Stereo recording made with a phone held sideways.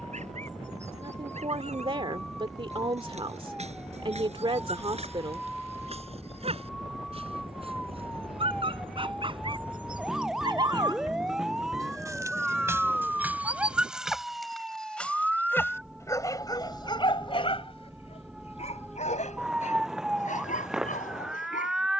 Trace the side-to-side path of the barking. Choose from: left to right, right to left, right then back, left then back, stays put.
right to left.